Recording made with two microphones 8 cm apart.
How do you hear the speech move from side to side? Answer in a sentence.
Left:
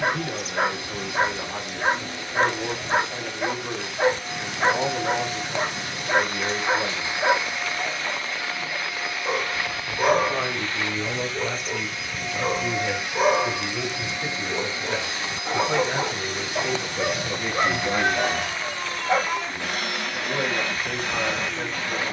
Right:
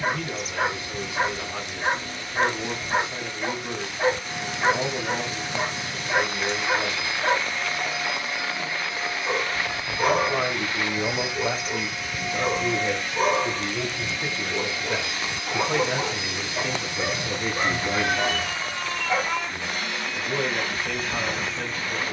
In this clip you hear the speech move from left to right and back again.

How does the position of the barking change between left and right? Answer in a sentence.
In this clip you hear the barking stay put.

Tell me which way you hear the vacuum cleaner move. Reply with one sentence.
In this clip you hear the vacuum cleaner move from left to right and back again.